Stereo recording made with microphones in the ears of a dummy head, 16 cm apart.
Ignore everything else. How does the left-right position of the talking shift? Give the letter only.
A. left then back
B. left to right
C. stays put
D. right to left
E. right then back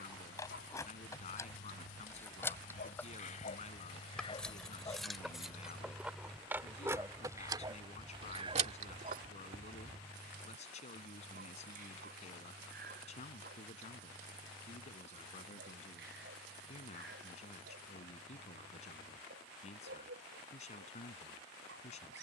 C.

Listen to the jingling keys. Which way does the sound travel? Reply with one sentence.
You can hear the jingling keys travel towards the right.